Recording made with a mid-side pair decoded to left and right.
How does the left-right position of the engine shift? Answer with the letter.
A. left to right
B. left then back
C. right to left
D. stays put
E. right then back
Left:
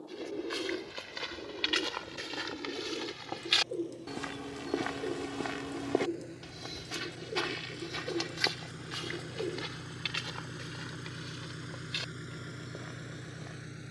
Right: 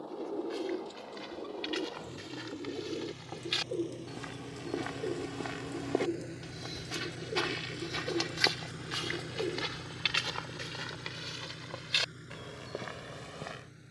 C.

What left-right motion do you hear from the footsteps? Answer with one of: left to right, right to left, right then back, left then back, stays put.
left to right.